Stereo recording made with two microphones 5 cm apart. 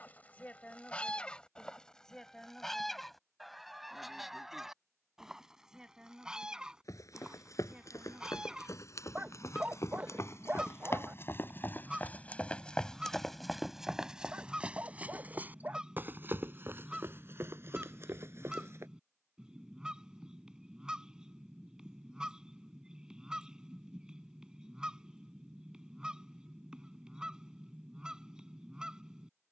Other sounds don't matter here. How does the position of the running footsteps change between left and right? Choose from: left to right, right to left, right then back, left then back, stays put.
left to right.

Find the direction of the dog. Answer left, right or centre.
right.